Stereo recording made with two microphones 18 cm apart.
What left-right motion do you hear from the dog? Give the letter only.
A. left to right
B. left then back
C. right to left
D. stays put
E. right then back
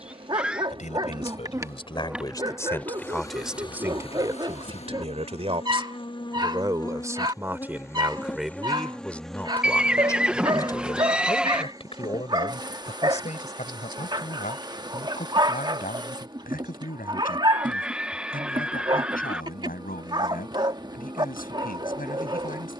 D.